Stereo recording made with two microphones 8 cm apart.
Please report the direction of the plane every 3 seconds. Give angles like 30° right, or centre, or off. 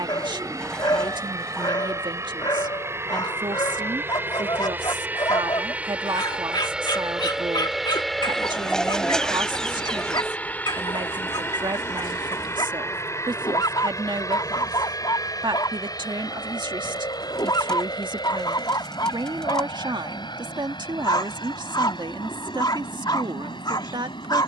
40° right, 30° right, 10° right, 20° left, 40° left, 50° left, 60° left, 60° left.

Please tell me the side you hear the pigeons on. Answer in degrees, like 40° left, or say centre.
10° left.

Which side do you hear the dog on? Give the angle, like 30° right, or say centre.
60° left.